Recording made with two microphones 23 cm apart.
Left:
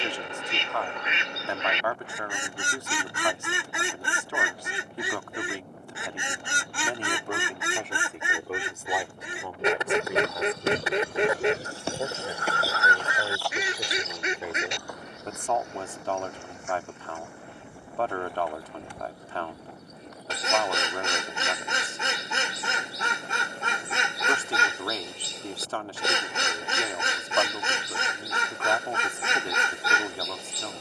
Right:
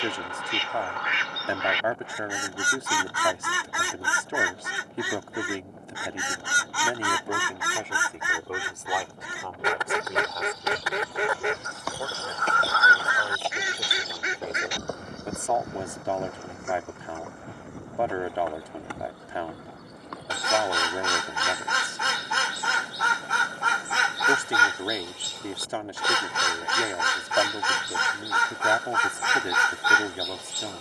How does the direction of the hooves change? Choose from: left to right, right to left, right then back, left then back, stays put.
left to right.